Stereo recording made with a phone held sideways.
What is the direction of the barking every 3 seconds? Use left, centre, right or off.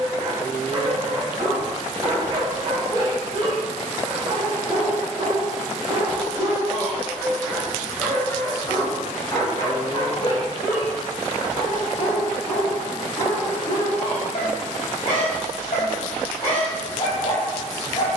right, right, centre, left, left, left.